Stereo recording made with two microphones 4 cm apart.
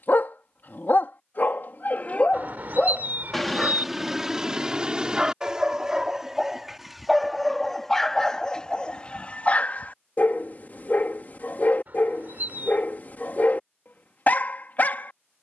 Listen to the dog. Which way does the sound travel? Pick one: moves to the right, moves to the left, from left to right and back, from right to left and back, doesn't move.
from left to right and back.